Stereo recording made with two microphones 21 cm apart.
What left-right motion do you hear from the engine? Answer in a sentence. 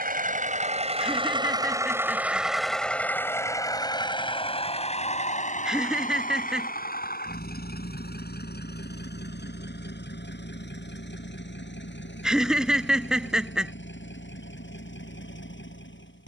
You can hear the engine move from right to left.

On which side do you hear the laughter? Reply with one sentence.
In this clip you hear the laughter in the centre.